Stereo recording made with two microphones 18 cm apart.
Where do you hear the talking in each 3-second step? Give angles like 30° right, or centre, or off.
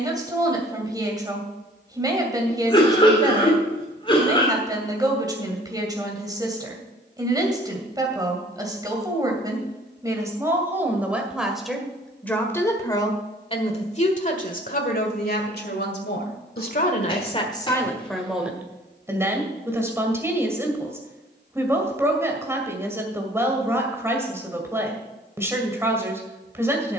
20° right, 20° right, 20° right, 10° right, 30° left, 50° left, 10° right, 10° right, 10° right.